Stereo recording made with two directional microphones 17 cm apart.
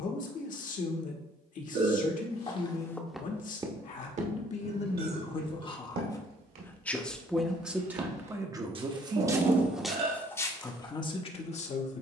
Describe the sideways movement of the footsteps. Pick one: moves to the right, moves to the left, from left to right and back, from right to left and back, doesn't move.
from left to right and back.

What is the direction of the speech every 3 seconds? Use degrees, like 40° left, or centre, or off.
50° left, 40° left, centre, 20° left.